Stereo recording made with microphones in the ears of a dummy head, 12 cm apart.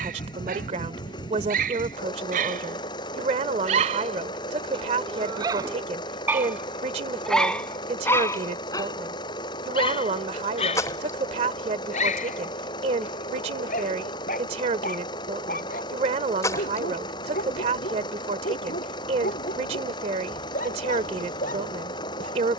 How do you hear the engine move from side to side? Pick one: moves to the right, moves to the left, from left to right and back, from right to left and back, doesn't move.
doesn't move.